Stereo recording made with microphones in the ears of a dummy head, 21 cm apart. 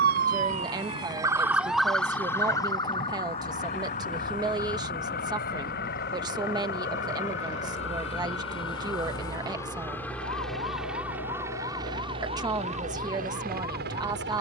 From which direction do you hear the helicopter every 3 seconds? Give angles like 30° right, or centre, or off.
50° left, 50° left, 30° left, centre, 40° right.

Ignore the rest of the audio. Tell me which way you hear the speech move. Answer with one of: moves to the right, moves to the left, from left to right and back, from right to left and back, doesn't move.
doesn't move.